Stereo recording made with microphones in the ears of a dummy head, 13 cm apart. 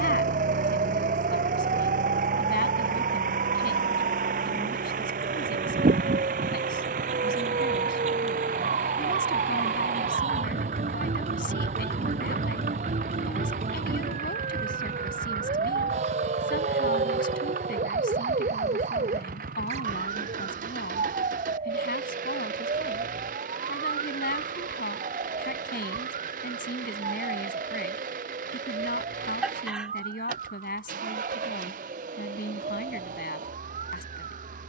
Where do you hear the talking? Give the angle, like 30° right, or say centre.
70° left.